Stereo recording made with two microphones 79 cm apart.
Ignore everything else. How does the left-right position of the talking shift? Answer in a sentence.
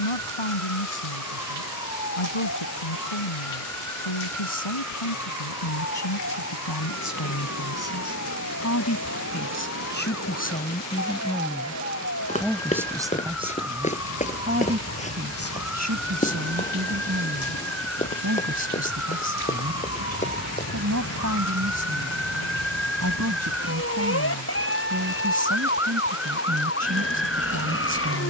You can hear the talking go from the left side to the right.